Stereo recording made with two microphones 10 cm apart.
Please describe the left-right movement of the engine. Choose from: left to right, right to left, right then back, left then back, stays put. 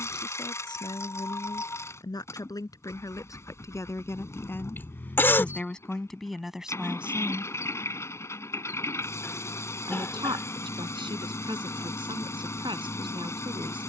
stays put.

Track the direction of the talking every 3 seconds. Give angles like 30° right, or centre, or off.
40° left, 20° left, 10° right, 60° right, 60° right.